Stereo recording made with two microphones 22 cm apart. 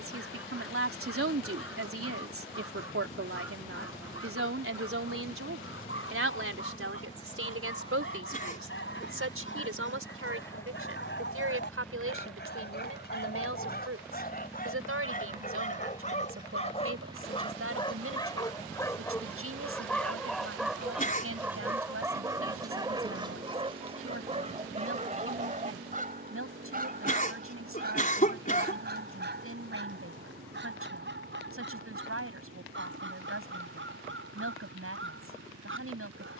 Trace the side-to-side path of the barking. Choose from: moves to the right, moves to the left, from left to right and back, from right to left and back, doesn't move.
moves to the right.